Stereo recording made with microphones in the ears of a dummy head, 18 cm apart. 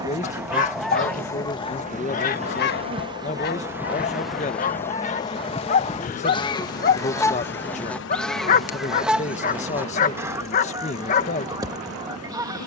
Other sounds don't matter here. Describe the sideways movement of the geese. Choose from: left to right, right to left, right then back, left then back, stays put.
left then back.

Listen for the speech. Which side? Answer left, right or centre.
left.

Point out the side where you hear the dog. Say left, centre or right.
left.